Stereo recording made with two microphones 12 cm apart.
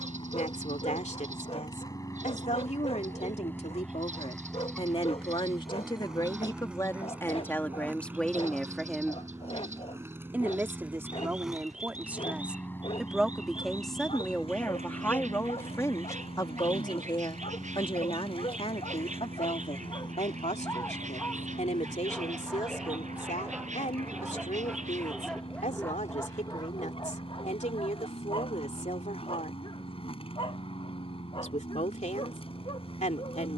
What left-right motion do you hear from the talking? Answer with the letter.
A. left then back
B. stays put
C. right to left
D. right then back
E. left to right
D.